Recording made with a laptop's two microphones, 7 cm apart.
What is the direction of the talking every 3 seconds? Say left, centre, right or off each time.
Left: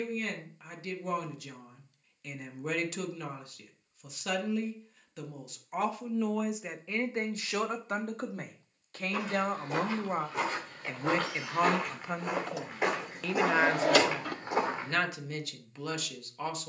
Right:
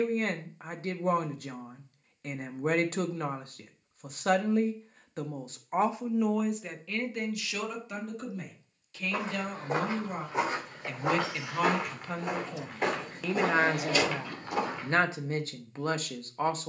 right, right, left, left, centre, right.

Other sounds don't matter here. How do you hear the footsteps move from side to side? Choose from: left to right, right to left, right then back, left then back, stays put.
right to left.